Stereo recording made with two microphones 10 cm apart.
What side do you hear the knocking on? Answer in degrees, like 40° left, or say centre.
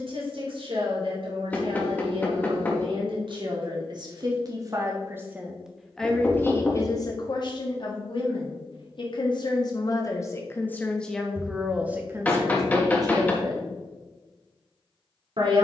10° left.